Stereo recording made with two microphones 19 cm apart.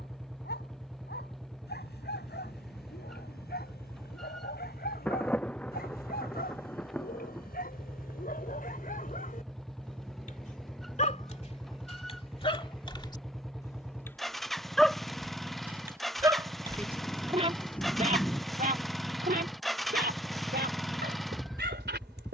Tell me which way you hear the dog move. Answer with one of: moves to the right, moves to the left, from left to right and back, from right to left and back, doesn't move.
moves to the right.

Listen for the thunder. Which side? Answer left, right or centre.
centre.